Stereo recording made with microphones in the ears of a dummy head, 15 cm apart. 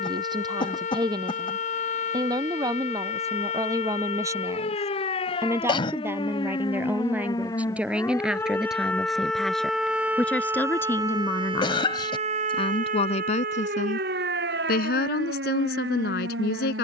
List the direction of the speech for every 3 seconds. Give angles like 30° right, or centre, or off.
20° right, 20° right, 10° right, 10° left, 50° left, 70° left.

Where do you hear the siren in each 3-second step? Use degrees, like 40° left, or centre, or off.
50° left, 40° left, 20° left, 20° right, 60° right, 80° right.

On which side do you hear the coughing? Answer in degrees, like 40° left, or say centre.
30° left.